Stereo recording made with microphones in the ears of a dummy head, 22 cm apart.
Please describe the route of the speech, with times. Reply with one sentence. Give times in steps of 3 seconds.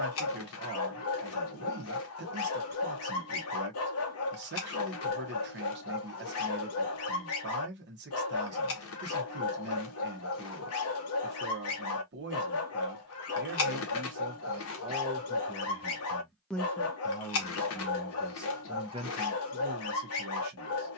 You can hear the speech on the right from 0 s, in the centre from 15 s and on the right from 18 s.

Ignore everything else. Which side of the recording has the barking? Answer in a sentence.
In this clip you hear the barking on the left.